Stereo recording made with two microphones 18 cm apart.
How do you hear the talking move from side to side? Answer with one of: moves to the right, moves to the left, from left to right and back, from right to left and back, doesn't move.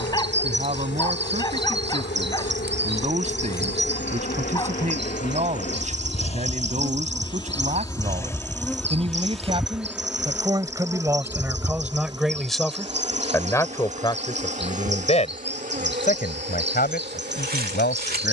moves to the left.